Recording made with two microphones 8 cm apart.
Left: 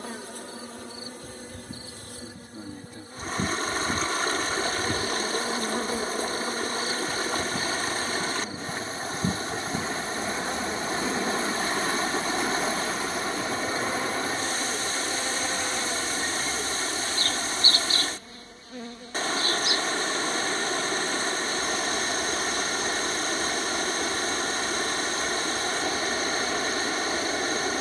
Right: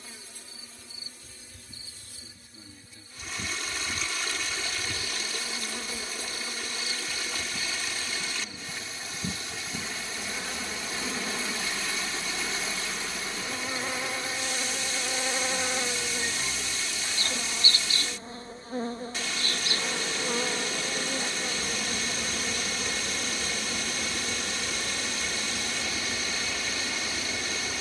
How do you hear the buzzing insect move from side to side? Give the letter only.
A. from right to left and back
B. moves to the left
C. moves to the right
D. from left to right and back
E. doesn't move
C.